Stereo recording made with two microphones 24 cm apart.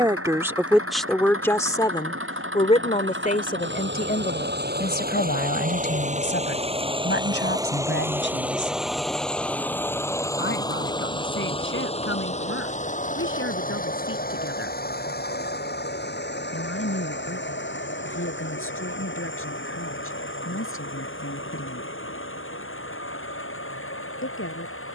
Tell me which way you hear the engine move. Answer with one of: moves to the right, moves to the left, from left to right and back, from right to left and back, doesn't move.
moves to the left.